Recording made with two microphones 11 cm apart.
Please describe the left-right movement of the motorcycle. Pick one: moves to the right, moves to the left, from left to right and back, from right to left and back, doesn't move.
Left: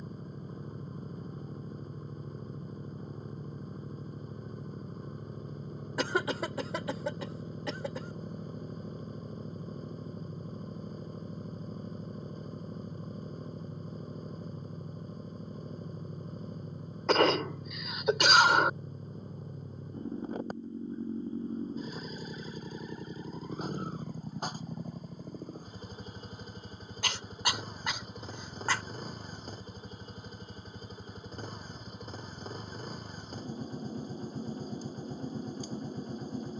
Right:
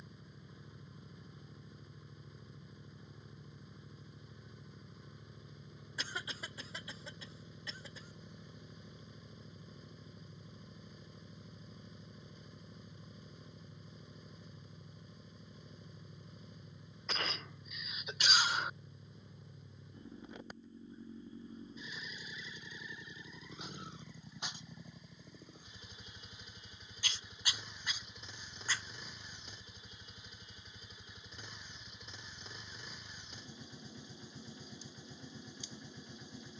doesn't move.